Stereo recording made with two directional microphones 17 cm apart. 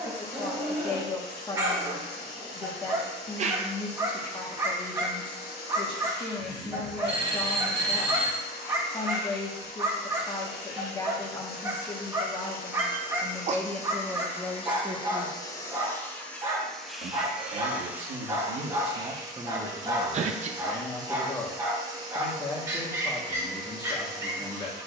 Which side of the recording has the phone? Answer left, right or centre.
right.